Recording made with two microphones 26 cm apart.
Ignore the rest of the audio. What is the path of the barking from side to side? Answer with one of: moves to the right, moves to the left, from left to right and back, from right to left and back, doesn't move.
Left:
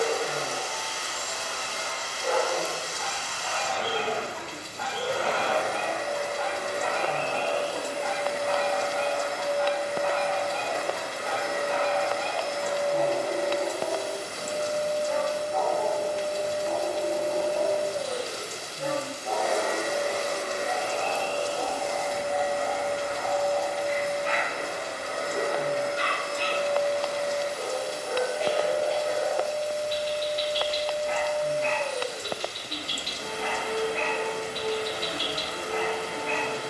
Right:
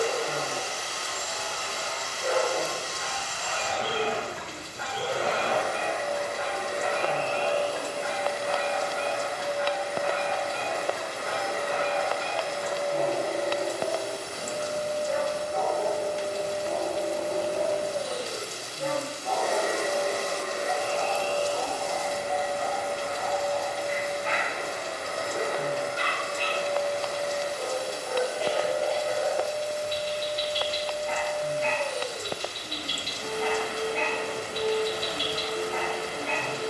moves to the left.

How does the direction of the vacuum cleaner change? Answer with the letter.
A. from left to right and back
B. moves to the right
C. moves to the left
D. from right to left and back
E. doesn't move
E.